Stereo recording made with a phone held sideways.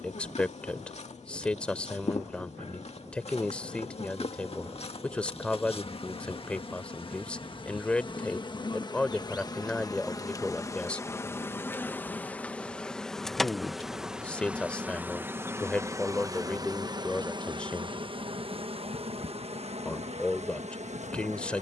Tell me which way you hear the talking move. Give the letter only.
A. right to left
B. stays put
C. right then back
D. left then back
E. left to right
B.